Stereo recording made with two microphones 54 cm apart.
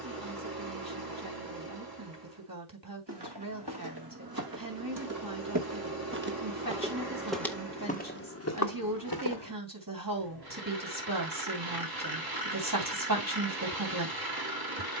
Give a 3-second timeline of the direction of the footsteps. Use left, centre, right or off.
off, right, centre, left, off.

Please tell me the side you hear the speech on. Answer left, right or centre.
right.